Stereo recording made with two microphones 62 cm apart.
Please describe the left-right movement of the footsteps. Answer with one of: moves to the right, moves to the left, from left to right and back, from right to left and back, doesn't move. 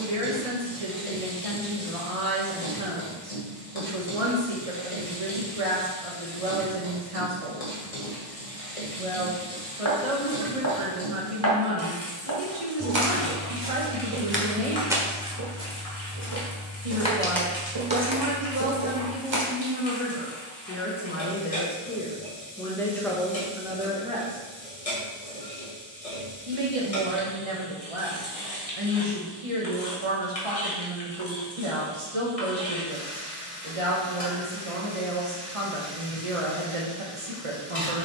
from right to left and back.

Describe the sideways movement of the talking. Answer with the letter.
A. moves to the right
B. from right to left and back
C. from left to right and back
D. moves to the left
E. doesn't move
B.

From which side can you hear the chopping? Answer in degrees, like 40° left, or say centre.
30° right.